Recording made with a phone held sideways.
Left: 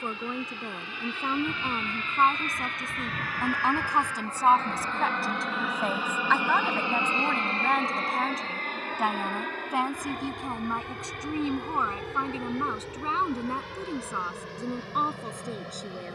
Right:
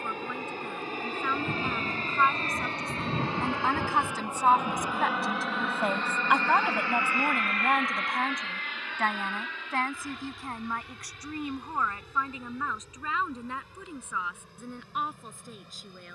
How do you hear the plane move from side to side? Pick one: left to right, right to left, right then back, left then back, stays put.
right to left.